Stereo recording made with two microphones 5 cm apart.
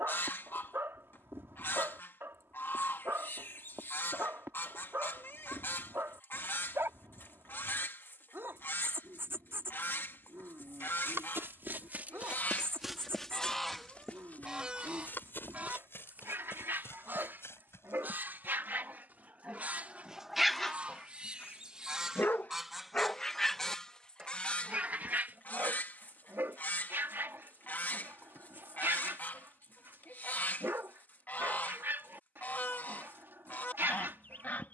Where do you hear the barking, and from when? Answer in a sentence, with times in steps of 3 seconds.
In this clip you hear the barking on the right from 0 s, on the left from 21 s and on the right from 24 s.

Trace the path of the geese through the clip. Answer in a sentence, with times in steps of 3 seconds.
In this clip you hear the geese on the left from 0 s, in the centre from 12 s, on the right from 15 s, in the centre from 21 s and on the left from 24 s.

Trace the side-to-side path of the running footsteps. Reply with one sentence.
In this clip you hear the running footsteps go from the right side to the left.